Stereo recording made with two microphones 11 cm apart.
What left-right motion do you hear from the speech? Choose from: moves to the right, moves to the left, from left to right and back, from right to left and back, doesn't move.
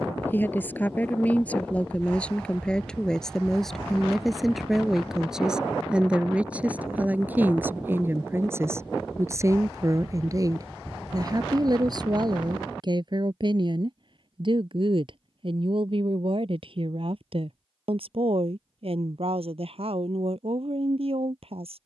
moves to the right.